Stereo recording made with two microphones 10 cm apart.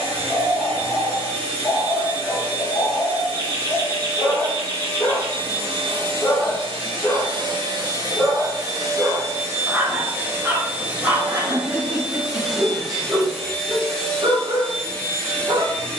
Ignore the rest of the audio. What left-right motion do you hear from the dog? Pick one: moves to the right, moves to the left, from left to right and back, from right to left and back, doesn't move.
moves to the right.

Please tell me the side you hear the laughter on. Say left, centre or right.
right.